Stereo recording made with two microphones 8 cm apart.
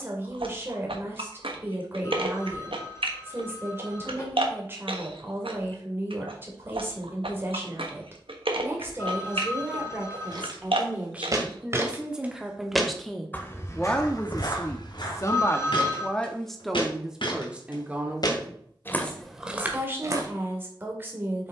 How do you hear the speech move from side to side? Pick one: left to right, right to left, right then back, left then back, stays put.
left then back.